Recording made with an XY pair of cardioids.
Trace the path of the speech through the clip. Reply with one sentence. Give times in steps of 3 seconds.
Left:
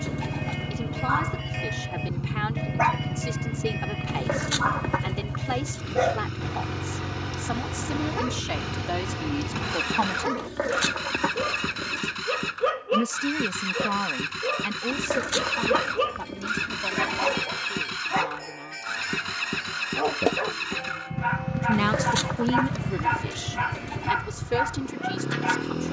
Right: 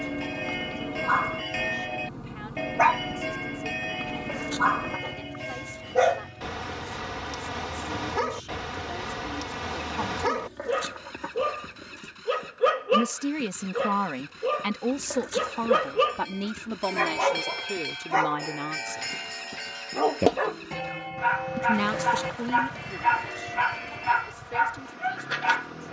In this clip you hear the speech on the left from 0 s, in the centre from 12 s, on the right from 15 s and on the left from 21 s.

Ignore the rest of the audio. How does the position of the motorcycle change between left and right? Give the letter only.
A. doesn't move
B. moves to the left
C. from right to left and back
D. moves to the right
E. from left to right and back
A.